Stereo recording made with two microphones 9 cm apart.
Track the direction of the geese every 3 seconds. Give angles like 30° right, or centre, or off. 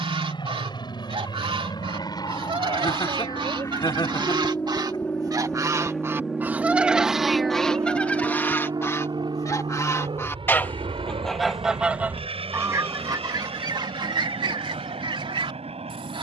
70° right, 50° right, centre, 10° left, 50° right, 70° right.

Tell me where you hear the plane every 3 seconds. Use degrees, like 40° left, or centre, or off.
50° left, 20° left, 30° right, 60° right, 70° right, 80° right.